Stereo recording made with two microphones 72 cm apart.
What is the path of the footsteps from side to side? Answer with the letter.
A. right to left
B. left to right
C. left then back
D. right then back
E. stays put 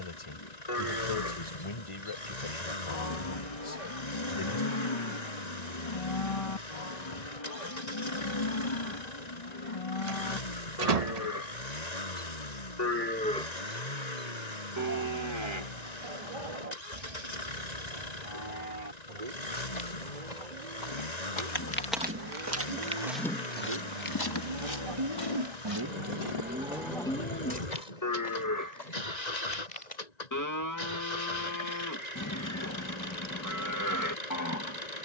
D.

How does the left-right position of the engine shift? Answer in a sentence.
In this clip you hear the engine stay in one place.